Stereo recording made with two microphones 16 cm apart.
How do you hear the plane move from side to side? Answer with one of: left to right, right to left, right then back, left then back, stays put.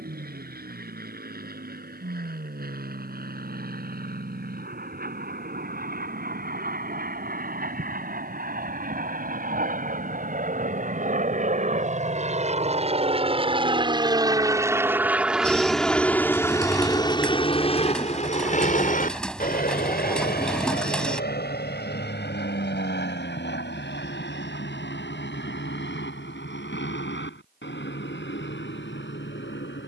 right to left.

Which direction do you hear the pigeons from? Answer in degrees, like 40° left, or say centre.
10° left.